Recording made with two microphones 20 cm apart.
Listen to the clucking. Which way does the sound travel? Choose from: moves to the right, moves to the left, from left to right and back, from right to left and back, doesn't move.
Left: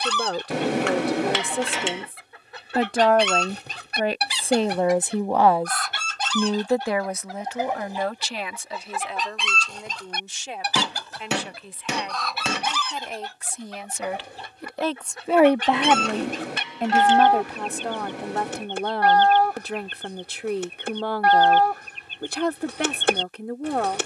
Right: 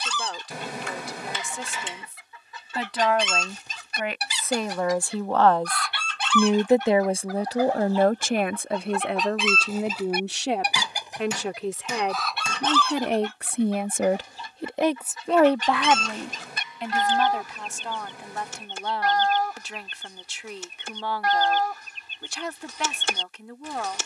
from left to right and back.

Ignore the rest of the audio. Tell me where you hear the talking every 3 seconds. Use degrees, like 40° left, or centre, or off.
60° left, 30° left, 40° right, 70° right, 50° right, 40° left, 60° left, 60° left.